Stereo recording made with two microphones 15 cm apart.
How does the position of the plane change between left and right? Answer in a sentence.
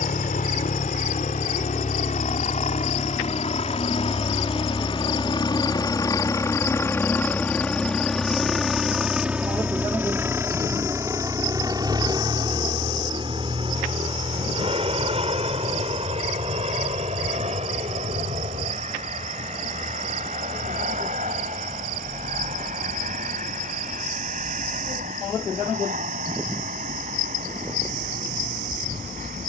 In this clip you hear the plane move from left to right.